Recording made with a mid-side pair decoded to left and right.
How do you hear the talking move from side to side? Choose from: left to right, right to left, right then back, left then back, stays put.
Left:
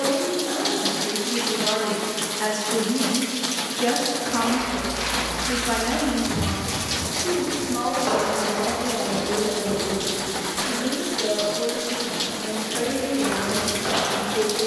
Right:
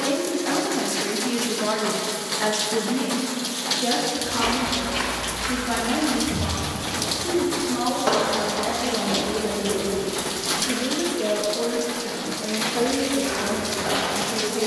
left then back.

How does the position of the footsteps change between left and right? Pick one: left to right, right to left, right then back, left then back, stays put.
right to left.